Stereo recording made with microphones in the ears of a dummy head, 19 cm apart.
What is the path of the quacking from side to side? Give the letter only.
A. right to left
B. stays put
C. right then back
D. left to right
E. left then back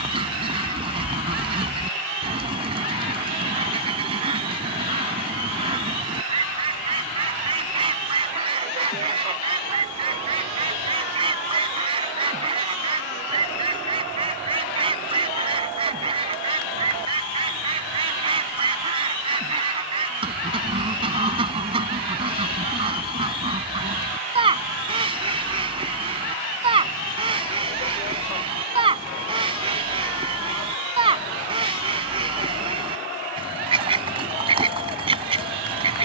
B.